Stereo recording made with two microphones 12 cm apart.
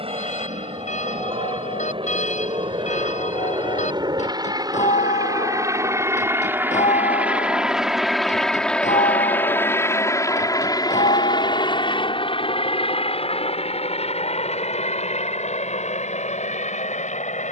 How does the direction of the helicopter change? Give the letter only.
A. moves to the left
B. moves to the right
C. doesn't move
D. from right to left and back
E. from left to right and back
A.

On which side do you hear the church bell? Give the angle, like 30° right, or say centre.
80° left.